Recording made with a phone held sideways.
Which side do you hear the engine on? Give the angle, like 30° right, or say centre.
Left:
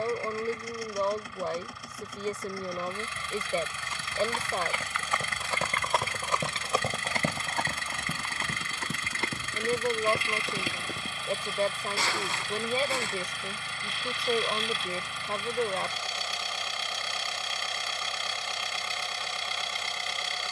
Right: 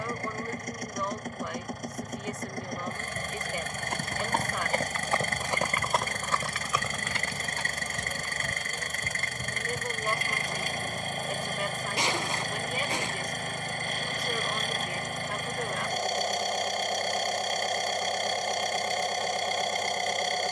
50° right.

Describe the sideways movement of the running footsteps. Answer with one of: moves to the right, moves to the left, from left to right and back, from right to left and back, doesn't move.
moves to the left.